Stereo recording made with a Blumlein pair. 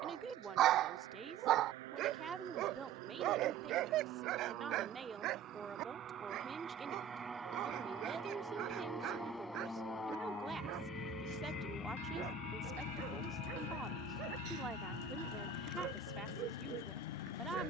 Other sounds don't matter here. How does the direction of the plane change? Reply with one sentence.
You can hear the plane move from right to left.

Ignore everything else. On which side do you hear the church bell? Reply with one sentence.
In this clip you hear the church bell on the right.